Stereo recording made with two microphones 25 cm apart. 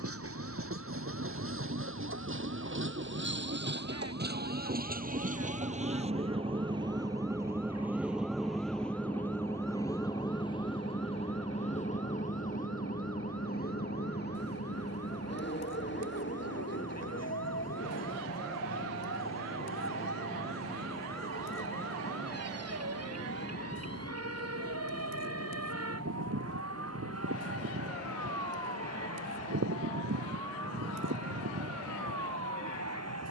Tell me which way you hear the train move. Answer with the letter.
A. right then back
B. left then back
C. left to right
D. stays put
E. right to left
E.